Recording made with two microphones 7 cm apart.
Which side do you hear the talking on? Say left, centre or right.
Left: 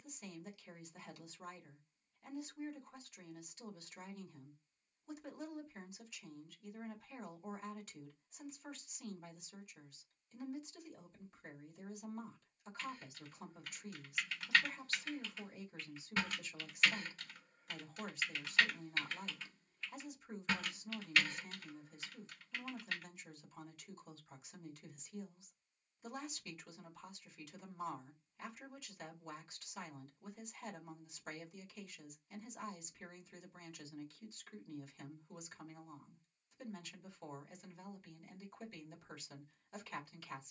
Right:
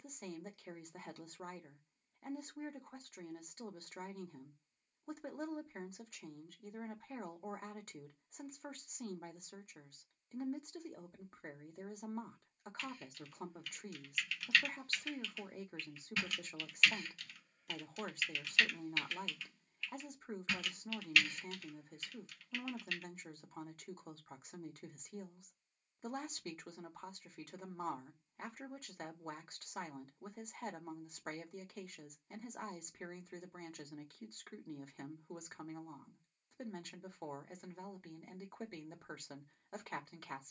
right.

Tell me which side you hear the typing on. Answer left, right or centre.
left.